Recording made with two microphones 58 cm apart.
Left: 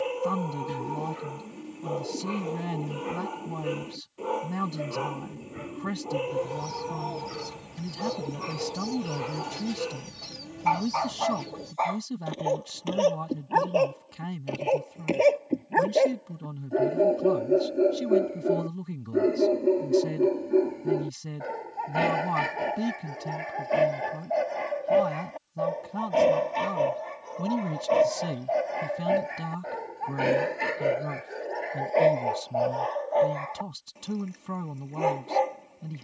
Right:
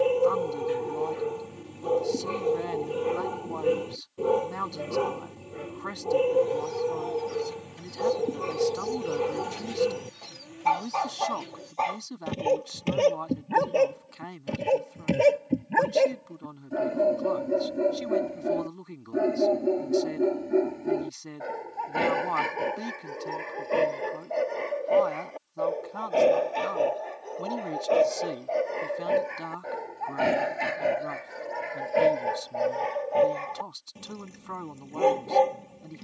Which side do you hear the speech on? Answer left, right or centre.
left.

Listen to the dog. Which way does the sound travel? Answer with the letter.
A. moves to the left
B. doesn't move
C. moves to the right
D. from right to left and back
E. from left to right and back
D.